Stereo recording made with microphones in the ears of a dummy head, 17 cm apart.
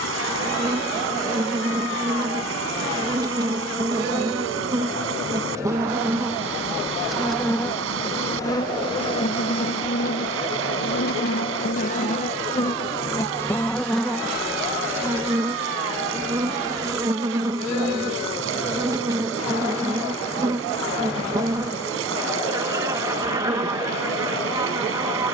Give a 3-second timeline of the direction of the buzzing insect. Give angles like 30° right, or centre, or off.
20° right, 20° right, 10° left, 40° left, 10° left, 20° right, 20° right, 20° right, 20° right.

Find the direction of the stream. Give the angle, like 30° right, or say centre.
80° right.